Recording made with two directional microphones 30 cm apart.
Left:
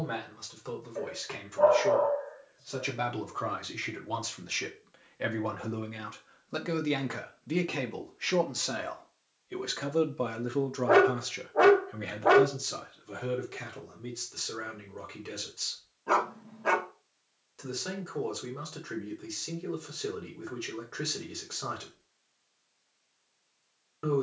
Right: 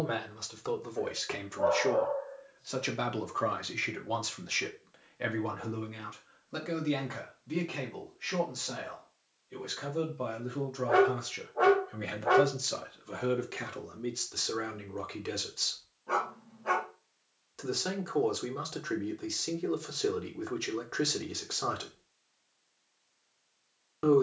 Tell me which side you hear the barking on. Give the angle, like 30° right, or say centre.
60° left.